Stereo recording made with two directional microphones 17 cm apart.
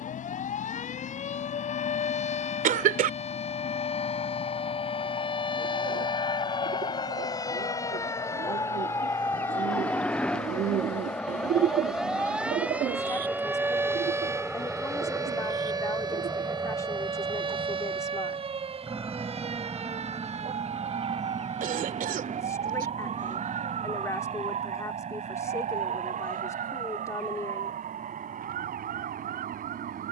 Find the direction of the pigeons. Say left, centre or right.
right.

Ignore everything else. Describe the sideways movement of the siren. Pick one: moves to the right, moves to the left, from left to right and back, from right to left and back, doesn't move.
moves to the right.